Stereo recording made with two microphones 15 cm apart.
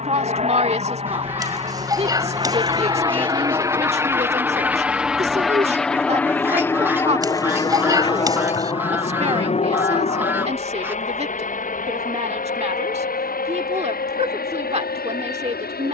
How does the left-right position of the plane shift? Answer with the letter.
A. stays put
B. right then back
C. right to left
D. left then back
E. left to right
C.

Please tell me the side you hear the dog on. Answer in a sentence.
In this clip you hear the dog on the right.